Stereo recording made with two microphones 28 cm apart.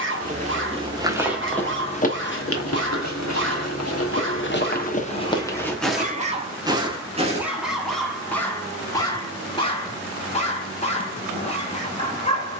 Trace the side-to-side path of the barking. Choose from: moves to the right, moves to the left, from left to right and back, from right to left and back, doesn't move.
moves to the left.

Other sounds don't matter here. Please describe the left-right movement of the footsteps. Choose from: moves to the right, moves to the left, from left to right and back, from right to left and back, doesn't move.
from right to left and back.